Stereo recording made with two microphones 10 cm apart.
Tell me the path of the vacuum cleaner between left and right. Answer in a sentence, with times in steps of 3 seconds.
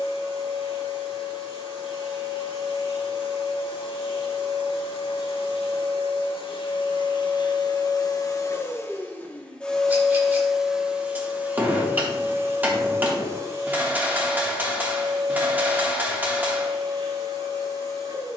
You can hear the vacuum cleaner on the left from 0 s, in the centre from 9 s and on the right from 12 s.